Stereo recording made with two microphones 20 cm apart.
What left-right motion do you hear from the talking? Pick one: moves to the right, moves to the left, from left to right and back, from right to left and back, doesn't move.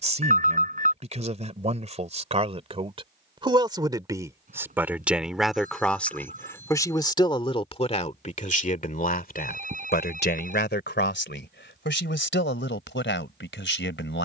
moves to the left.